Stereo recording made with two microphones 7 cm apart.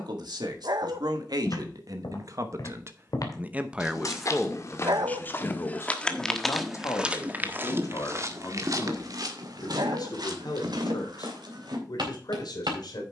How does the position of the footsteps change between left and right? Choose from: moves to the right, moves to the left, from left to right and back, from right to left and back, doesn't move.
moves to the right.